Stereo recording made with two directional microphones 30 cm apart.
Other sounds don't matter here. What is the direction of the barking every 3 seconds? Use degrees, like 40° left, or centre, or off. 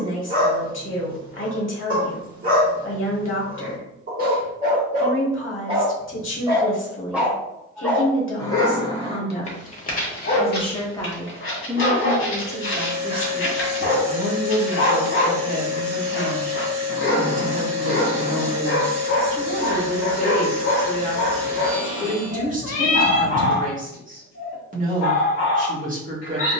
30° right, 30° right, centre, 30° left, 40° left, 40° left, 40° left, 40° left, 40° left.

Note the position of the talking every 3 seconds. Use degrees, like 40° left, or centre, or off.
40° left, 40° left, 40° left, 20° left, 20° right, 30° right, 30° right, 30° right, 30° right.